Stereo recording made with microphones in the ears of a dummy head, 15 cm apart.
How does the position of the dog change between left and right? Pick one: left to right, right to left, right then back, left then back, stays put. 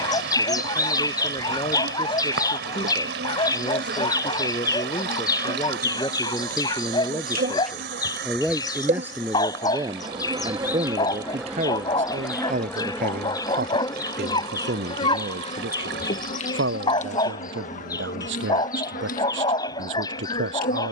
stays put.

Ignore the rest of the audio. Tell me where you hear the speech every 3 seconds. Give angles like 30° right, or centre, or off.
30° left, 20° left, 10° left, 30° right, 60° right, 70° right, 80° right.